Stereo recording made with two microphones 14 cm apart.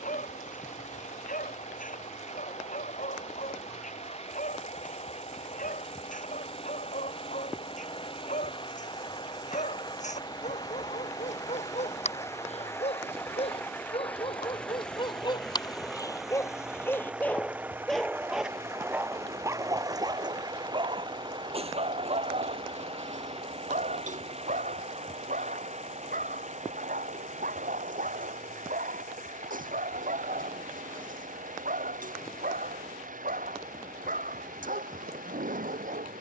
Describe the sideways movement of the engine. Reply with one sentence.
You can hear the engine move to the right.